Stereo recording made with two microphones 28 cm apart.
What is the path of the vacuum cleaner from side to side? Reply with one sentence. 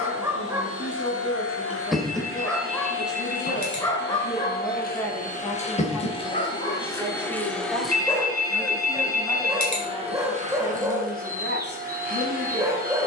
In this clip you hear the vacuum cleaner move from left to right.